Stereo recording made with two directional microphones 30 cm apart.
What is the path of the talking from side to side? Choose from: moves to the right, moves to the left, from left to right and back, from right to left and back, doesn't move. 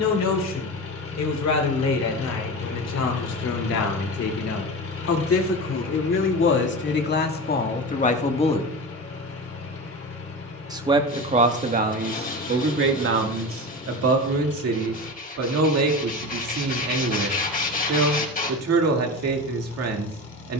moves to the right.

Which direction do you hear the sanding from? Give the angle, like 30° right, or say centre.
30° left.